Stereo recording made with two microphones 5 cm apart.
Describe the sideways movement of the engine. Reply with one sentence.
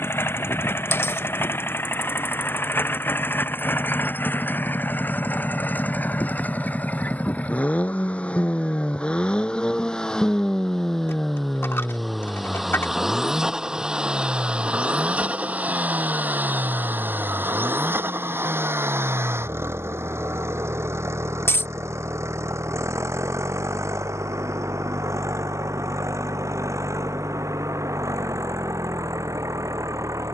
In this clip you hear the engine move to the right.